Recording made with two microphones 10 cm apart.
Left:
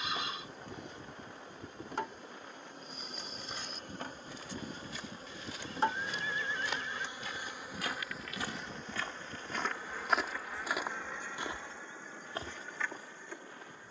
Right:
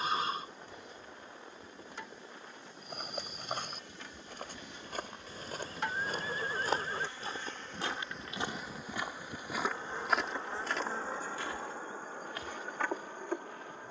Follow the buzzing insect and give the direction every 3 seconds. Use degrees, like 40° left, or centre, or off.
60° left, 40° left, 10° left, 30° right, 50° right.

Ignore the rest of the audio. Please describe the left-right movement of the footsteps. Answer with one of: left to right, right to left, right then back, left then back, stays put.
right to left.